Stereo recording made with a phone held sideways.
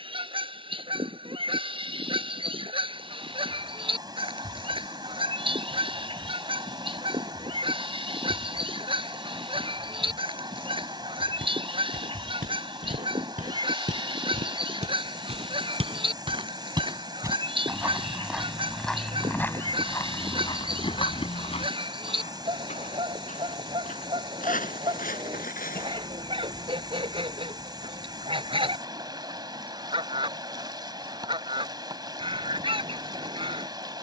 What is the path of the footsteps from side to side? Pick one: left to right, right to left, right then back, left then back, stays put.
right to left.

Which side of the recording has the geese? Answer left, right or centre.
right.